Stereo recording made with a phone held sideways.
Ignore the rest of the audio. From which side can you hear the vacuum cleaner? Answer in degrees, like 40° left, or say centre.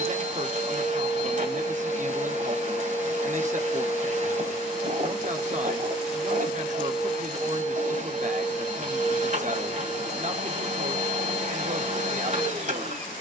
60° right.